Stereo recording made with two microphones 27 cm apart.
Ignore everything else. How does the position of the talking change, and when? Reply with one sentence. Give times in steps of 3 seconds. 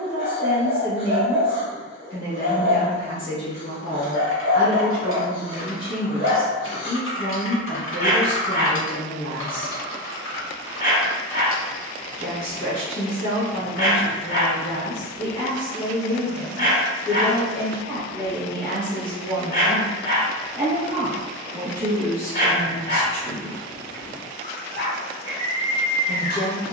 In this clip you hear the talking on the left from 0 s, in the centre from 18 s and on the left from 24 s.